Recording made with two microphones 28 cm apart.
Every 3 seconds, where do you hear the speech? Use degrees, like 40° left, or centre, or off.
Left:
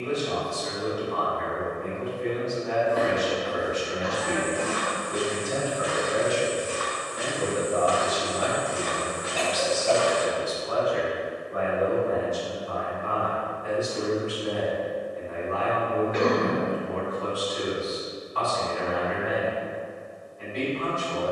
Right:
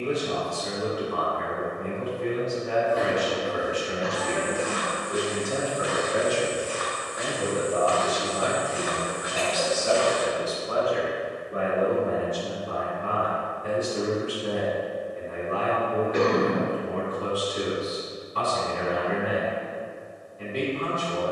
40° right, 40° right, centre, 20° right, 40° right, 40° right, 40° right.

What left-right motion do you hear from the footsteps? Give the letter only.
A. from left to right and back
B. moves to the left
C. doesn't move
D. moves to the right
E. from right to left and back
D.